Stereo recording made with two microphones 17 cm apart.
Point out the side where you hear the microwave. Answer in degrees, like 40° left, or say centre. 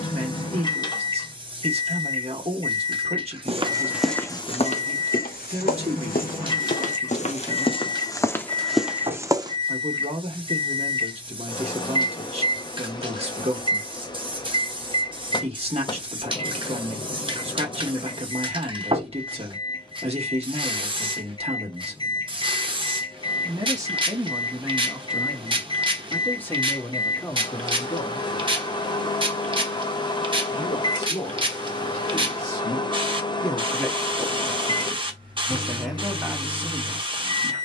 30° left.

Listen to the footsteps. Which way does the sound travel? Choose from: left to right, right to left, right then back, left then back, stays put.
left then back.